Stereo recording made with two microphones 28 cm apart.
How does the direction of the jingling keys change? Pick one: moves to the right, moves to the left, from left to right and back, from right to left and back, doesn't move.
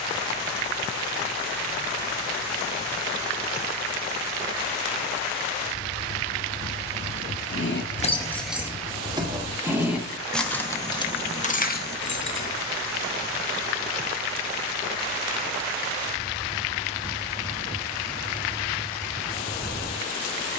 from left to right and back.